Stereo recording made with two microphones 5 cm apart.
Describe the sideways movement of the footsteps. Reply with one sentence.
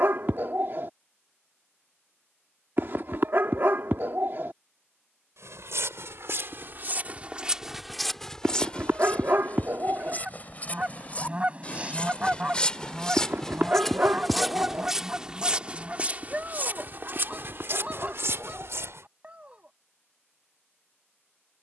You can hear the footsteps go left and come back.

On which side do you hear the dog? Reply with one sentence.
You can hear the dog on the right.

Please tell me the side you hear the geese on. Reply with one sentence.
You can hear the geese on the right.